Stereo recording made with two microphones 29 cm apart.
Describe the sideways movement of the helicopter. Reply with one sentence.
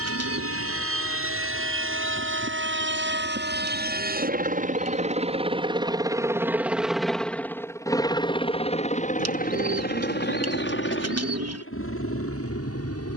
You can hear the helicopter go from the right side to the left.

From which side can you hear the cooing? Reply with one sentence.
In this clip you hear the cooing on the right.